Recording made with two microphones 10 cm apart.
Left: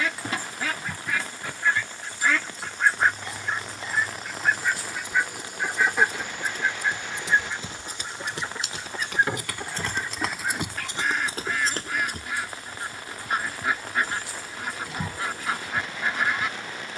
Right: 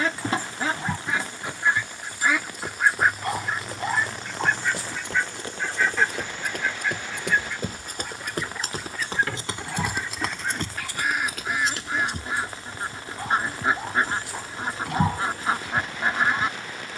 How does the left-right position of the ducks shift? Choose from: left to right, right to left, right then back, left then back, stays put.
left then back.